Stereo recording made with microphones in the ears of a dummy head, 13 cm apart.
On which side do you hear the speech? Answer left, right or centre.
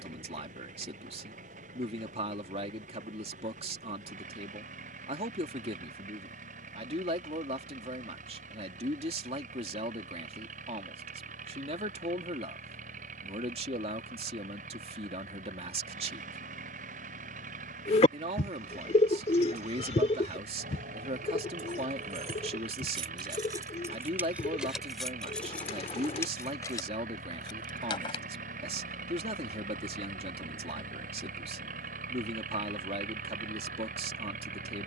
right.